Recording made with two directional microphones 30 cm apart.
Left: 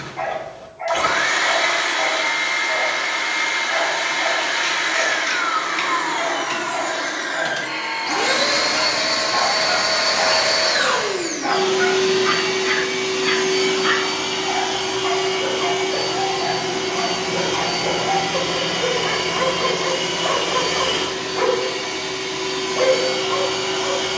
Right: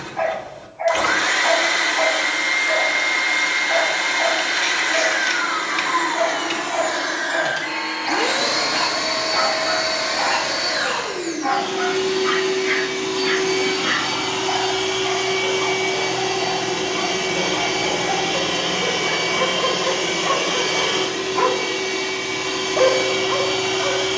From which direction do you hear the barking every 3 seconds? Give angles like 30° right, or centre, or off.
20° right, 20° right, 20° right, centre, 20° left, 40° left, 10° left, 10° right.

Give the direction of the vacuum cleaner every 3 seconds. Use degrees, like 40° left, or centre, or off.
20° right, 20° right, centre, 40° left, 10° left, 10° right, 10° right, 10° right.